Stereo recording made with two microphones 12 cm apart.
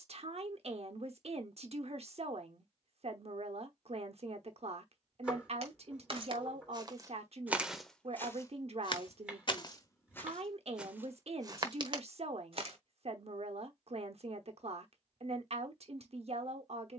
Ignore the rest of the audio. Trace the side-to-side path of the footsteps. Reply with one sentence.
In this clip you hear the footsteps go left and come back.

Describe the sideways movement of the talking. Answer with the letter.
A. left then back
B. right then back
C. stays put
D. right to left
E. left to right
C.